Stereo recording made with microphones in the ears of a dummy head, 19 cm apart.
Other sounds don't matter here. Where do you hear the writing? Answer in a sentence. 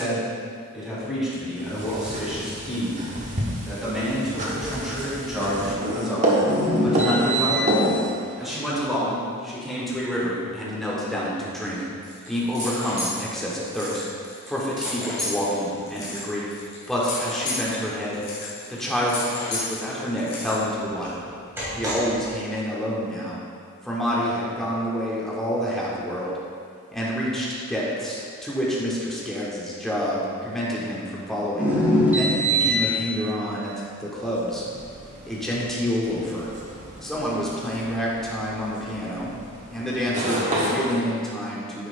In this clip you hear the writing on the right.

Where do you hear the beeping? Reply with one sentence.
In this clip you hear the beeping in the centre.